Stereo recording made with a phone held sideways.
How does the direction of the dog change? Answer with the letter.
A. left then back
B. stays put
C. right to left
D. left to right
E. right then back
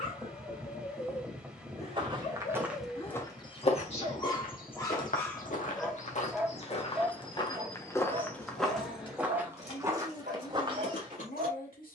D.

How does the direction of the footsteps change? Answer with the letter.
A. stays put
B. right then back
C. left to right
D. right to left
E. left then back
E.